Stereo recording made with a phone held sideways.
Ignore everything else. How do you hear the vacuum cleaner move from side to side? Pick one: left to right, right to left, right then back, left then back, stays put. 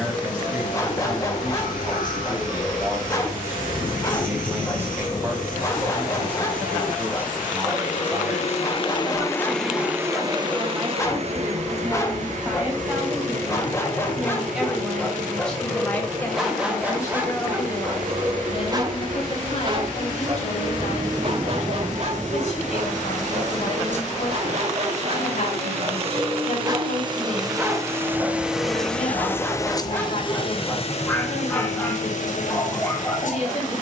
right then back.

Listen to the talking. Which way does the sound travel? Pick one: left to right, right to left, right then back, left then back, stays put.
right to left.